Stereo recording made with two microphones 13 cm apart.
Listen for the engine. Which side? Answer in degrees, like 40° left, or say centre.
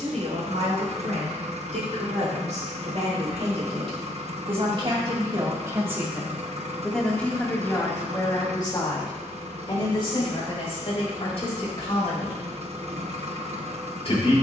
60° right.